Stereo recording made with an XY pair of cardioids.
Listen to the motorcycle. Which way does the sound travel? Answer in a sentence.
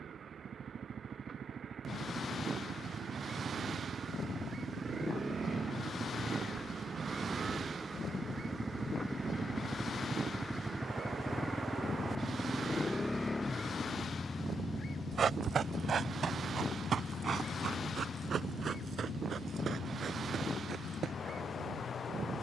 You can hear the motorcycle go from the right side to the left.